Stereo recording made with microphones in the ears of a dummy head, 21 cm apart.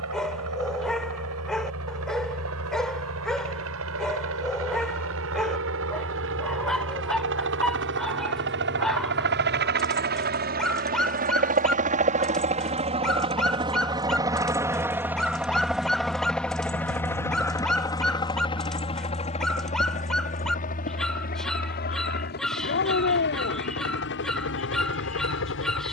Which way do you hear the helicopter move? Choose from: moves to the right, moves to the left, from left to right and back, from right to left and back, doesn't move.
moves to the left.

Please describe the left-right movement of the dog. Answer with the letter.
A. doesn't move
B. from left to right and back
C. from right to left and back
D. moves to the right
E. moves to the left
A.